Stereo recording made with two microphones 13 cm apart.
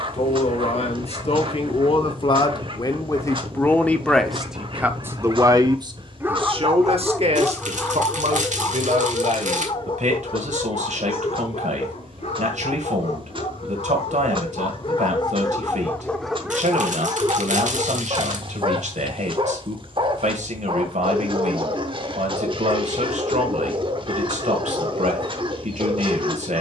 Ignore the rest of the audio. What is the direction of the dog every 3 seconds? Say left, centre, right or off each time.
right, right, centre, left, left, centre, right, right, right.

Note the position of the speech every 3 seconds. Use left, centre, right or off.
left, centre, right, right, right, right, right, right, right.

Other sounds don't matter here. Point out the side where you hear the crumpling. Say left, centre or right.
right.